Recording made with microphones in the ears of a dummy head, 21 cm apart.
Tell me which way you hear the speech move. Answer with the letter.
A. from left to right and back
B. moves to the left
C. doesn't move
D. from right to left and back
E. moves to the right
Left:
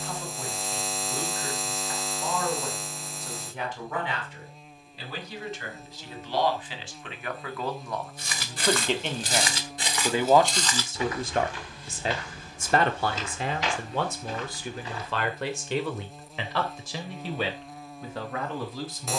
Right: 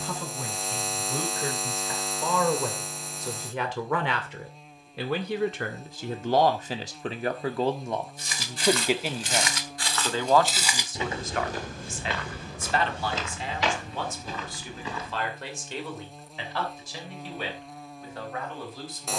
B.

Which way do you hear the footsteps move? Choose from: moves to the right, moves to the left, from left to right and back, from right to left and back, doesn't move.
moves to the right.